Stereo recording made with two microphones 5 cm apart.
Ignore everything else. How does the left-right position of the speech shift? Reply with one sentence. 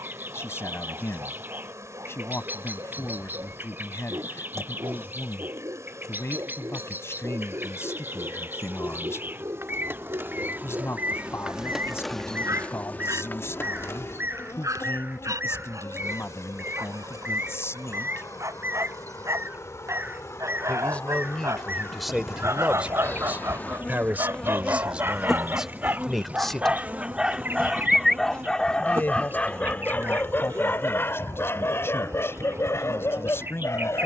You can hear the speech move from left to right and back again.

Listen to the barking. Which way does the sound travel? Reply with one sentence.
You can hear the barking travel towards the left.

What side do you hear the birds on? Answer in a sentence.
In this clip you hear the birds on the right.